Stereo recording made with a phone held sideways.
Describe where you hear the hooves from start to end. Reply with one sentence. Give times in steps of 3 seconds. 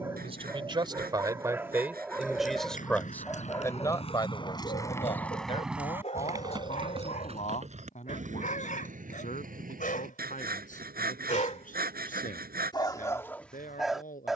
In this clip you hear the hooves on the left from 0 s, on the right from 6 s and not at all from 12 s.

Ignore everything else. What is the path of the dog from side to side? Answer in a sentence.
In this clip you hear the dog go left and come back.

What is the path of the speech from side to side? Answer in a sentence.
You can hear the speech go from the right side to the left.